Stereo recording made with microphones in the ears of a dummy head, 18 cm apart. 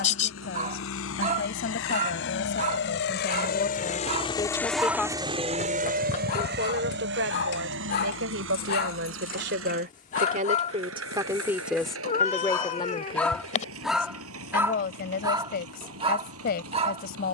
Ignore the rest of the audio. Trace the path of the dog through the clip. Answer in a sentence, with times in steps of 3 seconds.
In this clip you hear the dog on the right from 0 s, on the left from 6 s, in the centre from 12 s and on the right from 15 s.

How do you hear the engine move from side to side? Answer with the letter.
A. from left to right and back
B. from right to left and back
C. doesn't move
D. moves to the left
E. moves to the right
E.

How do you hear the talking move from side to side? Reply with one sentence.
In this clip you hear the talking go right and come back.